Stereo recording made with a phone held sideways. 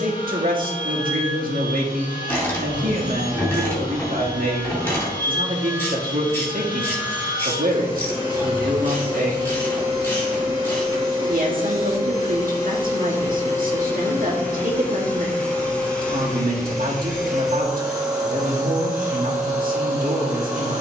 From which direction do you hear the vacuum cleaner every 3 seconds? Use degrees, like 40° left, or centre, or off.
40° left, 40° left, 40° left, 30° left, 20° left, centre, 10° right.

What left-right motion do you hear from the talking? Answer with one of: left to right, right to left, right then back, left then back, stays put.
stays put.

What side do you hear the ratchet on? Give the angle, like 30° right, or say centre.
10° left.